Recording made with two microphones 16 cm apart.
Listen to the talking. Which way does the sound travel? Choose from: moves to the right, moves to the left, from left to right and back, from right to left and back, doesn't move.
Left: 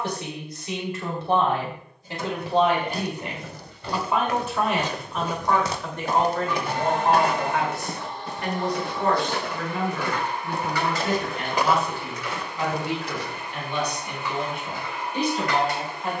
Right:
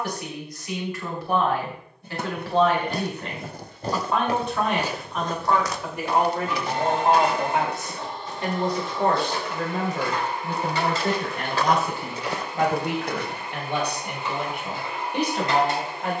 moves to the right.